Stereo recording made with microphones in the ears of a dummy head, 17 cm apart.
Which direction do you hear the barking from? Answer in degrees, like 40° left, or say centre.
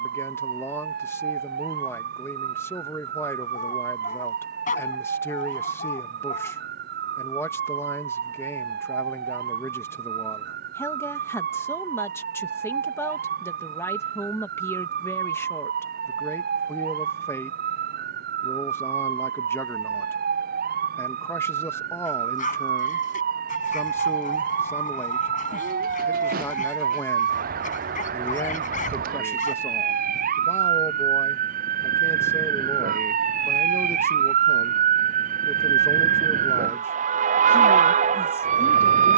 40° left.